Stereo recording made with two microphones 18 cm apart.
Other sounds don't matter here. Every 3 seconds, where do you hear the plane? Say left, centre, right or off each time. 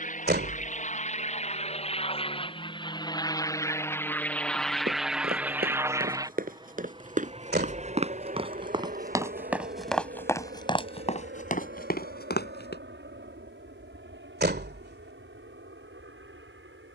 left, centre, right, right, right, right.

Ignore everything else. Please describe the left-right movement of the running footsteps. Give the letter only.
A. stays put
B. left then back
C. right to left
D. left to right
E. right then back
C.